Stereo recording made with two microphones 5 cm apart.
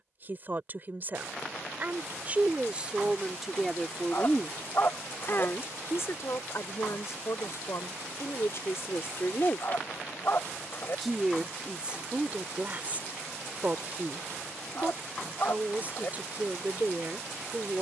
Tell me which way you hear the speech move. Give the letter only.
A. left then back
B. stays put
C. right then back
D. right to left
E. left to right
A.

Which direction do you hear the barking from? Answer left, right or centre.
left.